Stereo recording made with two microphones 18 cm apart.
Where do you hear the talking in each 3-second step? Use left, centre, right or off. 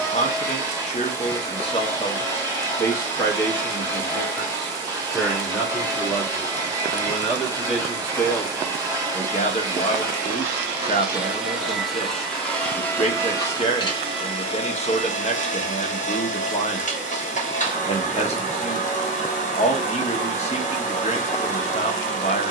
left, centre, centre, left, left, left, left, left.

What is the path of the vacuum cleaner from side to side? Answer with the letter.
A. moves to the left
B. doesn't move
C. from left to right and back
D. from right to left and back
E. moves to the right
A.